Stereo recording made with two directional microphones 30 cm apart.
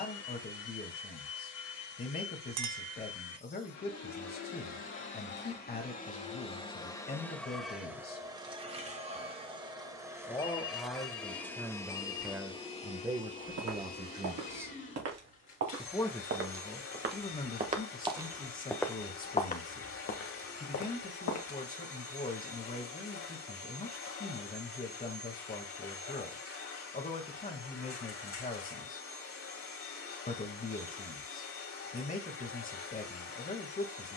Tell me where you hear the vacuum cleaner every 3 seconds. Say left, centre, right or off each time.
left, left, centre, centre, left, left, left, left, left, left, left, left.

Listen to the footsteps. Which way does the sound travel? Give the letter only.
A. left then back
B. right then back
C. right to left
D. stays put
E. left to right
C.